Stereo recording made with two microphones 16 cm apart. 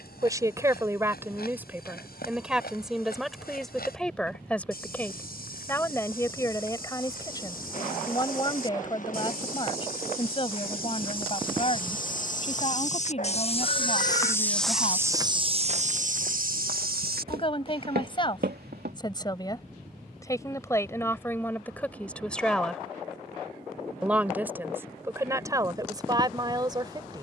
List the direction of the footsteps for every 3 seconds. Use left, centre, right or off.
left, left, left, left, left, right, right, off, off.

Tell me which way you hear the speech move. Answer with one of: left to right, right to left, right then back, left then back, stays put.
left then back.